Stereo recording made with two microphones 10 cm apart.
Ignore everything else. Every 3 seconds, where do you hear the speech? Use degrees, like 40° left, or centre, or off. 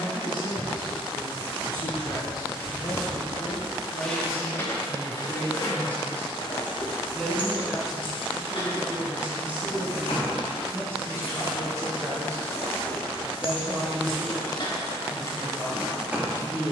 40° left, 30° left, centre, 20° right, 40° right, 50° right.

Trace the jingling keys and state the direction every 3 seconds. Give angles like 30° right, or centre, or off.
30° right, 20° left, 50° left, 70° left, 60° left, centre.